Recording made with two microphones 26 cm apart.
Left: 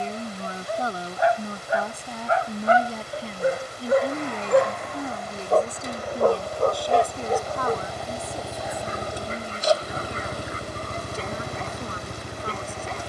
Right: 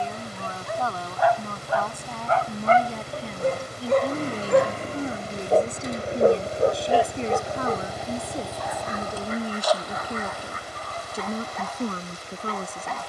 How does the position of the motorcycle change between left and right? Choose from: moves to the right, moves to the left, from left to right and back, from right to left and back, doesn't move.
moves to the left.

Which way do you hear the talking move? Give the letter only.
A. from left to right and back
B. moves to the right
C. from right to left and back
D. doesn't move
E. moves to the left
B.